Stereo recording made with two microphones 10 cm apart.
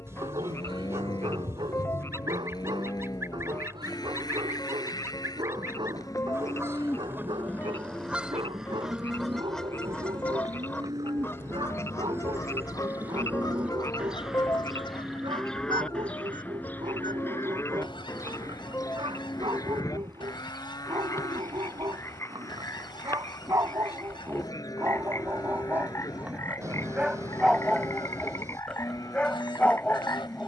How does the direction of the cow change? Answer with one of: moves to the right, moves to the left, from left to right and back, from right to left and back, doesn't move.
from left to right and back.